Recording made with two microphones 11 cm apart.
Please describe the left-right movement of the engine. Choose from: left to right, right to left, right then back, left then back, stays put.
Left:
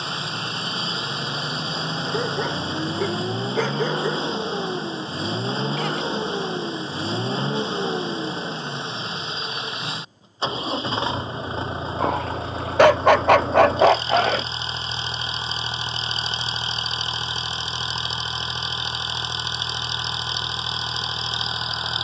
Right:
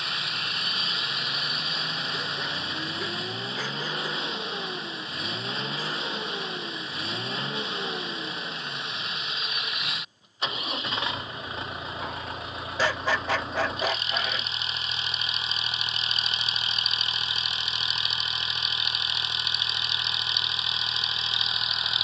stays put.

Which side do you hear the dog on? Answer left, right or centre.
left.